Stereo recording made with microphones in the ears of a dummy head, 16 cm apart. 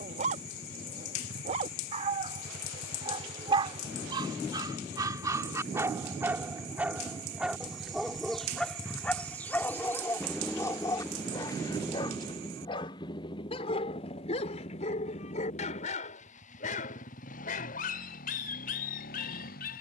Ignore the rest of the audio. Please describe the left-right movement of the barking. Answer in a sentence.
You can hear the barking move to the left.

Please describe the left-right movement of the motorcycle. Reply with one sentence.
In this clip you hear the motorcycle travel towards the left.